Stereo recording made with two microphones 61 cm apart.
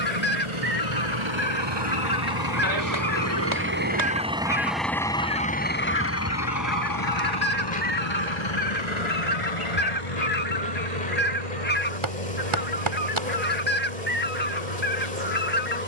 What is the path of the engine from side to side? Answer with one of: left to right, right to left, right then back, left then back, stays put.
right to left.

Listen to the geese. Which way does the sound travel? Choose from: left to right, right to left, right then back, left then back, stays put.
stays put.